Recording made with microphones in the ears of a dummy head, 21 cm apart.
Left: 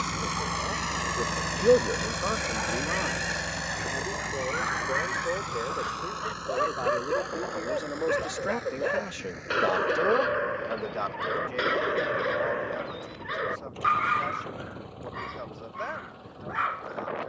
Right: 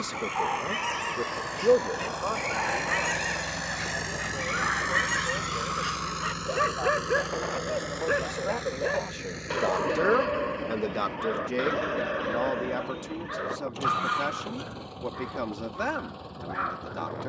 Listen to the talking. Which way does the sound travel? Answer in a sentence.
In this clip you hear the talking move from right to left and back again.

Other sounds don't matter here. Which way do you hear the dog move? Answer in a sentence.
You can hear the dog move to the left.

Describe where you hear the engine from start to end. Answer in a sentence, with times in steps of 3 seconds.
You can hear the engine on the left from 0 s, in the centre from 3 s and on the right from 6 s.